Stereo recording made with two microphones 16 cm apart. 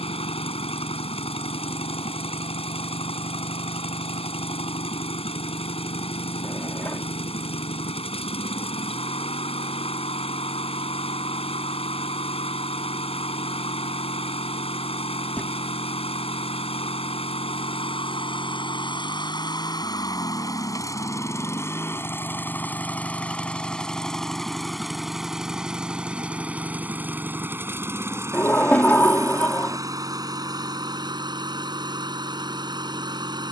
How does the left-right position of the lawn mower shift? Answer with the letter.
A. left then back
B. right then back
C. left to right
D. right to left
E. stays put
C.